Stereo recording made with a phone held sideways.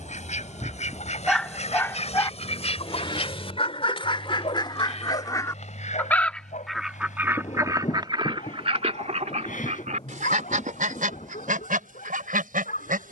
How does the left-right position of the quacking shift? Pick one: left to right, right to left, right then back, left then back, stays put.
left to right.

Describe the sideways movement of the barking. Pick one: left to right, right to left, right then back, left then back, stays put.
right to left.